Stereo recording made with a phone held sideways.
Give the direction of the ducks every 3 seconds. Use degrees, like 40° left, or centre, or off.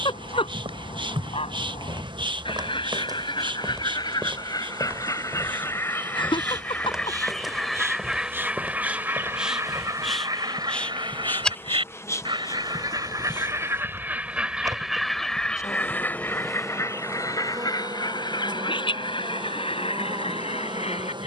40° left, 30° left, centre, 30° right, 20° right, 20° left, 40° left.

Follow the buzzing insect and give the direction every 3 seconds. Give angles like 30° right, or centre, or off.
40° right, 40° right, 20° right, centre, 30° left, centre, 30° right.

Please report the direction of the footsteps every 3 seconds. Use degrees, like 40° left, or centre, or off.
40° right, 20° right, centre, 10° left, 20° right, 30° right, off.